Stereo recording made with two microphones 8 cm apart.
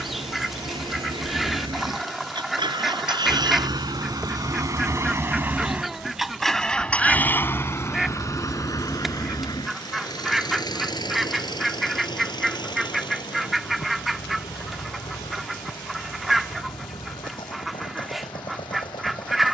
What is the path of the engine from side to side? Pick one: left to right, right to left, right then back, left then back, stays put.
right to left.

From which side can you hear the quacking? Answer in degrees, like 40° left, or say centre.
centre.